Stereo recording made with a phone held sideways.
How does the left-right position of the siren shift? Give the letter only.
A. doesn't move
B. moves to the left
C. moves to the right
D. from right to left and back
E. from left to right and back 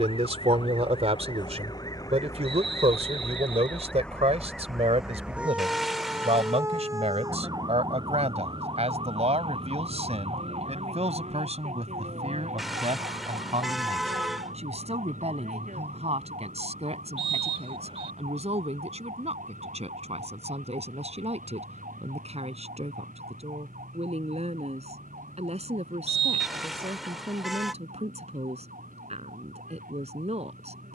C.